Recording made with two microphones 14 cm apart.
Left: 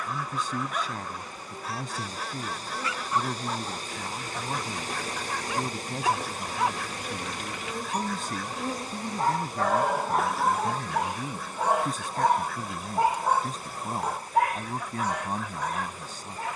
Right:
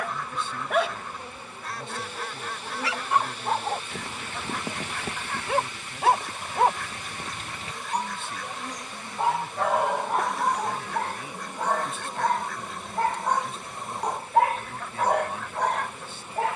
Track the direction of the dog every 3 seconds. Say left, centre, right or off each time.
right, right, right, centre, centre, right.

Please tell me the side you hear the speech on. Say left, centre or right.
left.